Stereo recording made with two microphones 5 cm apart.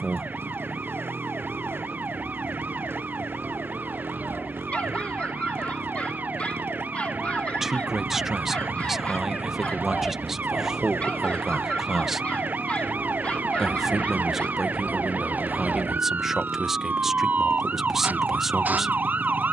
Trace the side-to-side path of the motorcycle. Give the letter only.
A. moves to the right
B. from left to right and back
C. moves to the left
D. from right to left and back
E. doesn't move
E.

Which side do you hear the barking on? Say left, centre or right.
left.